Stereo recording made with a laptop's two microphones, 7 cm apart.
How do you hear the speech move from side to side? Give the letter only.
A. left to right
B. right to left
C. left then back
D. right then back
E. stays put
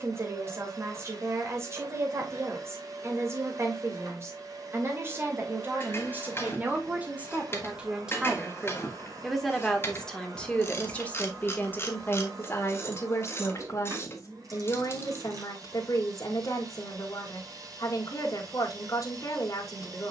B.